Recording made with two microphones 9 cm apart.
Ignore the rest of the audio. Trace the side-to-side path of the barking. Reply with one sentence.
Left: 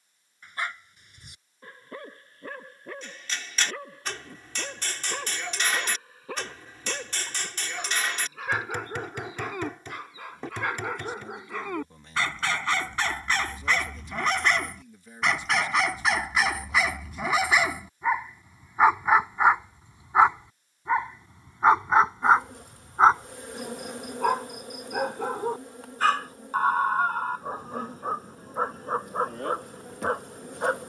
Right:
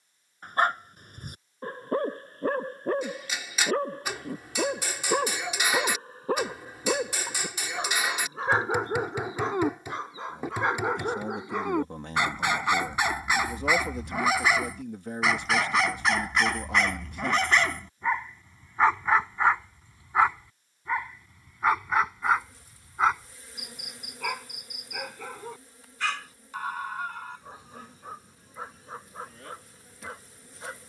You can hear the barking travel towards the left.